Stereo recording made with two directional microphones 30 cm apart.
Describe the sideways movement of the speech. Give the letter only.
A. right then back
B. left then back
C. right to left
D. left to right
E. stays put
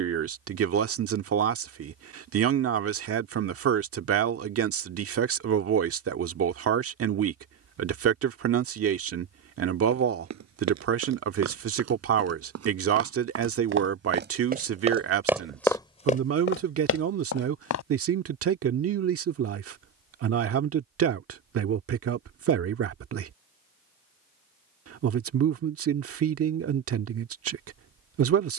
E.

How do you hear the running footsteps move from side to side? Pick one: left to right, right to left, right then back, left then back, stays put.
right to left.